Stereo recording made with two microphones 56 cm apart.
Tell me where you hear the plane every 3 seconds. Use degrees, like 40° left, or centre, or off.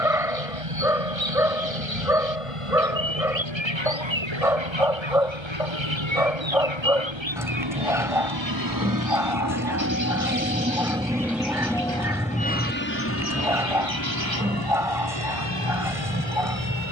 70° right, 70° right, 50° right, 10° right, 20° left, 40° left.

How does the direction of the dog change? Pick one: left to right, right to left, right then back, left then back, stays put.
stays put.